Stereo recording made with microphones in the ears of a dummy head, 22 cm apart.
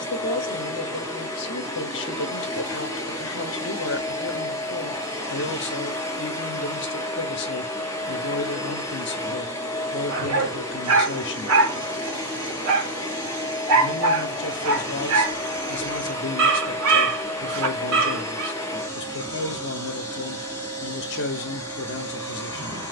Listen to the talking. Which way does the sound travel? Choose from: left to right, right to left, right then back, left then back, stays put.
stays put.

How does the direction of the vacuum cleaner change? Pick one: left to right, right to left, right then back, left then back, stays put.
stays put.